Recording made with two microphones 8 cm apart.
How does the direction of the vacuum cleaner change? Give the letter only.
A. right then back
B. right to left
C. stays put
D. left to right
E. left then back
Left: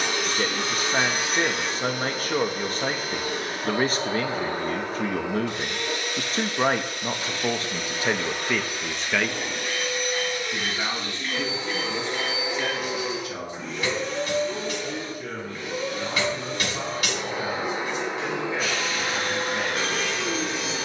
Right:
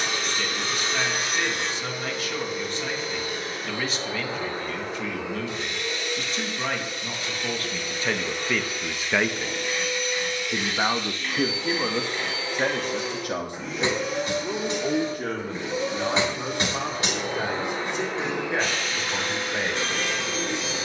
A.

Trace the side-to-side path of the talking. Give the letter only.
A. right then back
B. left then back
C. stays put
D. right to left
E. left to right
E.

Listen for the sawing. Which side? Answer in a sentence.
You can hear the sawing in the centre.